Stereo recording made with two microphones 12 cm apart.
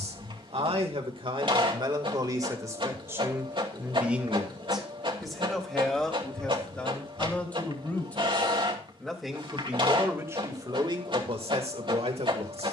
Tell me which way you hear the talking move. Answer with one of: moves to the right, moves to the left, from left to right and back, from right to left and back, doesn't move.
from right to left and back.